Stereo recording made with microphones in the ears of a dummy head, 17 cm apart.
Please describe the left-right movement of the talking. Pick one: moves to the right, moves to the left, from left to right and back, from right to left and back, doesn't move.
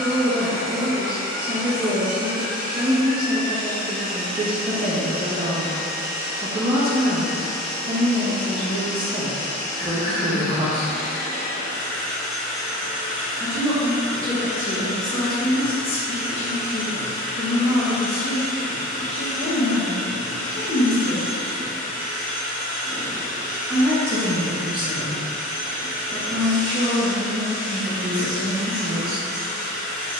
from right to left and back.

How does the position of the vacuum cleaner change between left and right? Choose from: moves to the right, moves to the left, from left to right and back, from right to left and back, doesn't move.
from right to left and back.